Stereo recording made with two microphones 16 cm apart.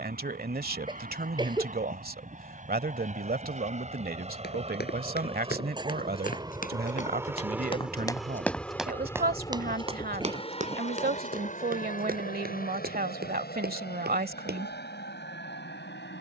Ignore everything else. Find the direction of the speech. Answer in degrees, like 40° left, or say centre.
60° right.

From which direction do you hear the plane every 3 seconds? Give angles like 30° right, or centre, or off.
60° right, 40° right, 10° right, 30° left, 60° left, 70° left.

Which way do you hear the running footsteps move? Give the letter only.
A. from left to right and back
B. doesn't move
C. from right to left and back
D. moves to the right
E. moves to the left
D.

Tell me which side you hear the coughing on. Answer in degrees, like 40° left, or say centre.
30° right.